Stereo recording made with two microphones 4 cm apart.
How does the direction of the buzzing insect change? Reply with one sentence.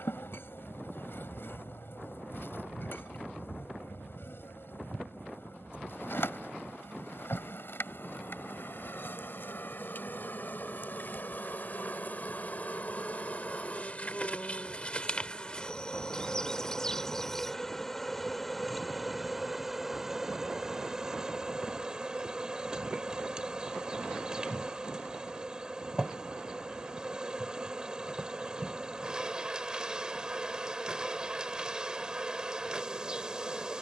In this clip you hear the buzzing insect go from the left side to the right.